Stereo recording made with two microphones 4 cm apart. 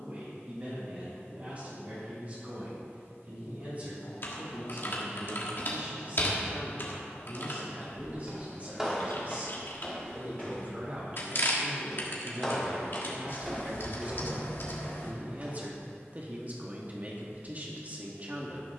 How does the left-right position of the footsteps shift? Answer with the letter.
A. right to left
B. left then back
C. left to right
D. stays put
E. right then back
B.